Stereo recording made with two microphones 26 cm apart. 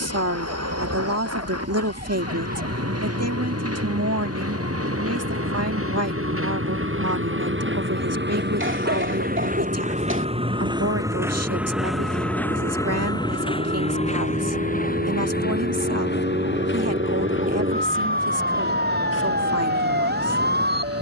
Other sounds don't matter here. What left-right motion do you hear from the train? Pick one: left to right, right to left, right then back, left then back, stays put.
right to left.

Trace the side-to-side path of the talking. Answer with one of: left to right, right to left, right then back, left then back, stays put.
stays put.